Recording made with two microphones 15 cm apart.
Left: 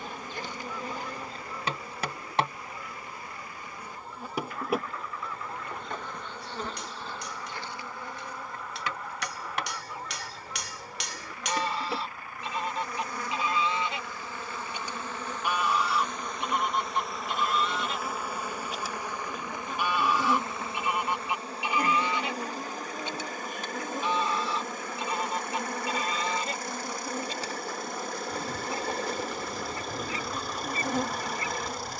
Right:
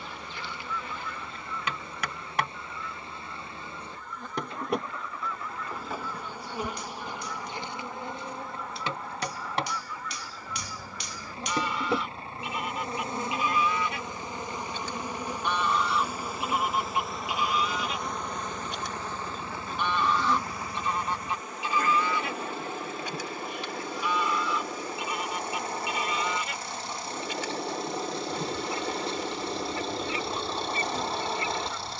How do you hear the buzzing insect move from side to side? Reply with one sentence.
In this clip you hear the buzzing insect go right and come back.